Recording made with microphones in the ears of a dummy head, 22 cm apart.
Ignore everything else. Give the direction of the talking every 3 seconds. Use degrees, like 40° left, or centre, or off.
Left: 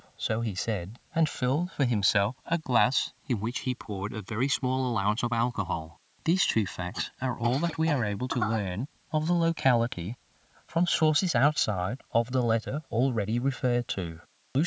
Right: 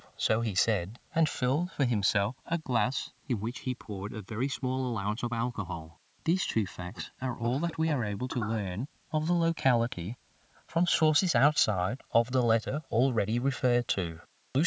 10° right, 20° left, 10° left, centre, 20° right.